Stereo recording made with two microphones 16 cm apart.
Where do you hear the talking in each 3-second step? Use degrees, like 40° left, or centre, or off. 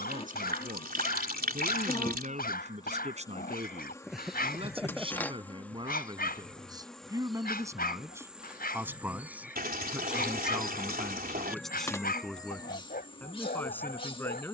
50° right, 40° right, 20° right, centre, 10° left.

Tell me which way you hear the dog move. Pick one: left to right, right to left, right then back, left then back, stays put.
stays put.